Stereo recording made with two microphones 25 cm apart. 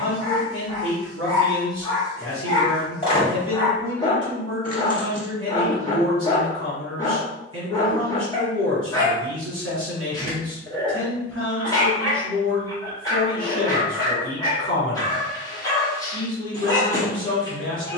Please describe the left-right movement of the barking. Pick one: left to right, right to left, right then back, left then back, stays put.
stays put.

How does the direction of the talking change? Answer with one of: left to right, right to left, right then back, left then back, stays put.
stays put.